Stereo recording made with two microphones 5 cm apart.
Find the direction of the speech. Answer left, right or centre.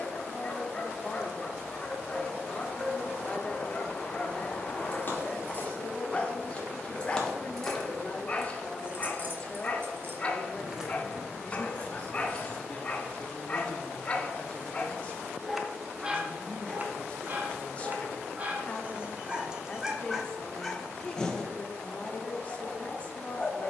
left.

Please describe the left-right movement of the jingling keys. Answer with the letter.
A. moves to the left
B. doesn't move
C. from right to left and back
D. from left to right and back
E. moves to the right
D.